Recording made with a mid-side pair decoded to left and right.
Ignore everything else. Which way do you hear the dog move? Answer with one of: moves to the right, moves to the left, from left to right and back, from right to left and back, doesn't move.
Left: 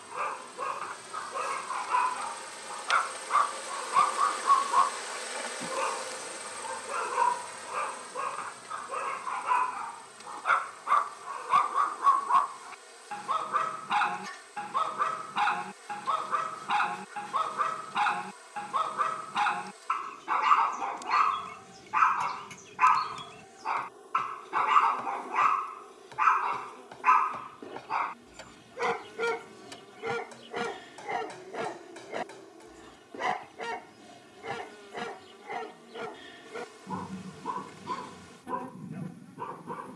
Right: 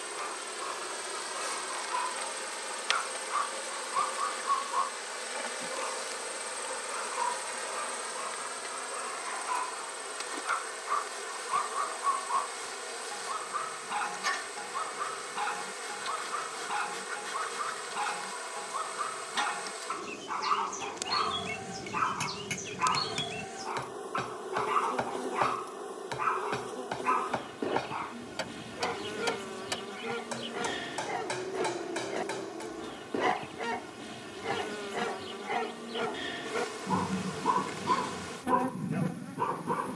moves to the right.